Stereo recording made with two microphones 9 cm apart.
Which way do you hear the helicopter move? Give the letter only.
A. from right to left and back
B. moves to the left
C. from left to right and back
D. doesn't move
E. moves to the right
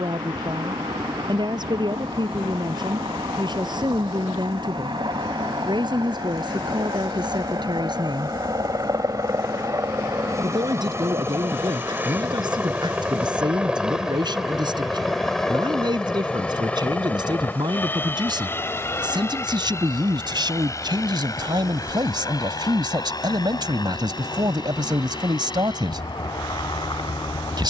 B.